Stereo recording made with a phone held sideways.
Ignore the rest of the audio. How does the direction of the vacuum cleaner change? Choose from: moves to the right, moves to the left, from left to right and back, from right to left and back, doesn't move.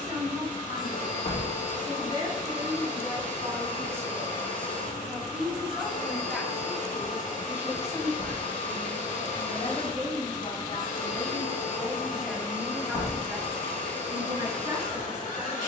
doesn't move.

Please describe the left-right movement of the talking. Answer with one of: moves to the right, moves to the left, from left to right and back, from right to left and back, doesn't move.
from right to left and back.